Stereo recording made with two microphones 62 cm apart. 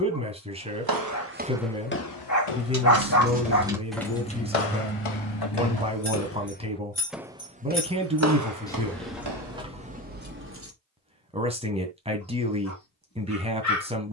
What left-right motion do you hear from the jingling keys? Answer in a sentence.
You can hear the jingling keys go left and come back.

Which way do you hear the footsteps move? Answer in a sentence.
You can hear the footsteps move from right to left and back again.